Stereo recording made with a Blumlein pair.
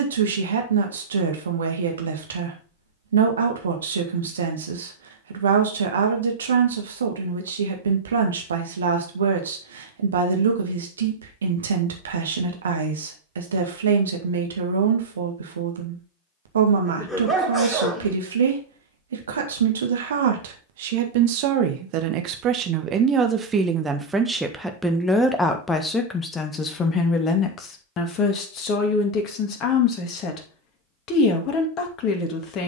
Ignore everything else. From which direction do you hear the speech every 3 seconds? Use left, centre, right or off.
right, right, right, right, right, right, right, right, centre, left, left.